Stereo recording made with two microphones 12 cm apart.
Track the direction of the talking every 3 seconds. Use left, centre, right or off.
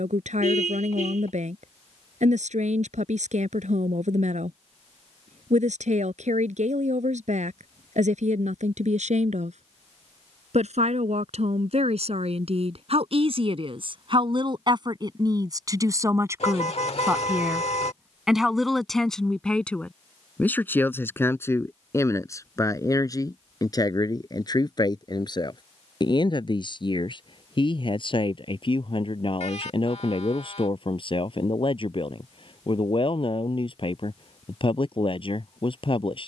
right, right, right, right, right, right, centre, left, left, left, left, left.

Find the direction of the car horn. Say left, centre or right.
left.